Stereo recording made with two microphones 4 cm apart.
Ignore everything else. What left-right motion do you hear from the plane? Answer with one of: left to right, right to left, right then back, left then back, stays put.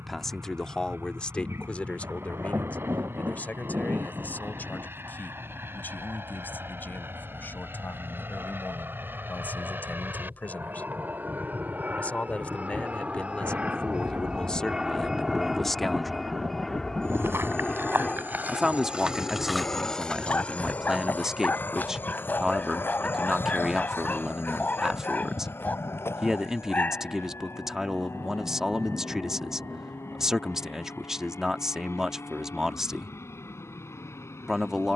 right to left.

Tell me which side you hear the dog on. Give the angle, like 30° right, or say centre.
40° left.